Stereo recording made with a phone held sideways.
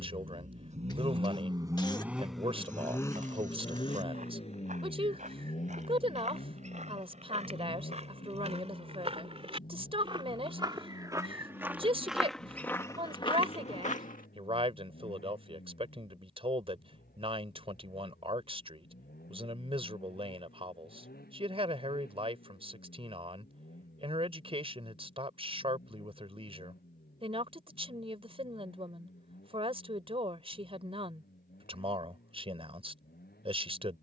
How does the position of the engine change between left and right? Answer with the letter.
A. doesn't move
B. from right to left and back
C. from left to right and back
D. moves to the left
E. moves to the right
D.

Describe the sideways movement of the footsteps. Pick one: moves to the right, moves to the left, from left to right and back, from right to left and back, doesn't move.
moves to the left.